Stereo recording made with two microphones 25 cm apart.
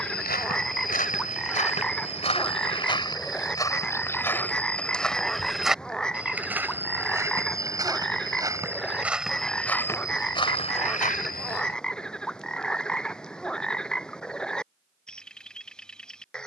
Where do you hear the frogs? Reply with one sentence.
You can hear the frogs in the centre.